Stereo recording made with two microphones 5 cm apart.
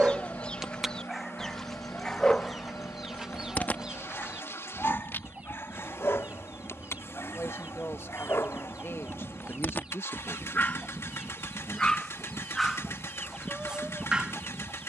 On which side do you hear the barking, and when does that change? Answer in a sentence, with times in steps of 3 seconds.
In this clip you hear the barking in the centre from 0 s, on the left from 3 s and in the centre from 12 s.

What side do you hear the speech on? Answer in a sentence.
You can hear the speech on the left.